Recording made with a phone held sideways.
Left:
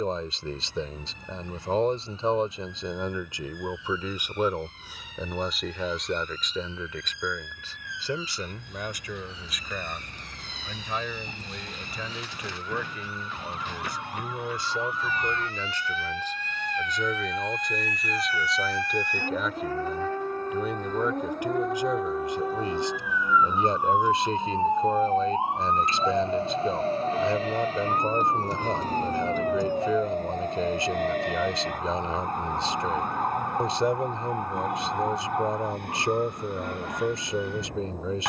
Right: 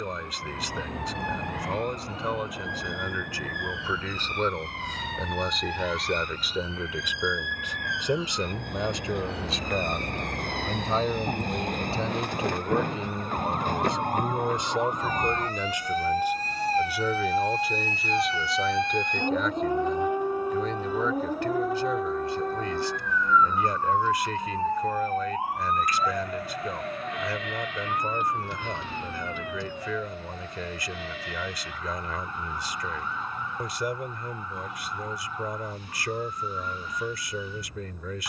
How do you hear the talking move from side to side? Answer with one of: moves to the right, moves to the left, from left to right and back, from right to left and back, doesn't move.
from left to right and back.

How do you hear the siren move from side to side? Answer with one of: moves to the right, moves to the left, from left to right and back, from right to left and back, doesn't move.
moves to the left.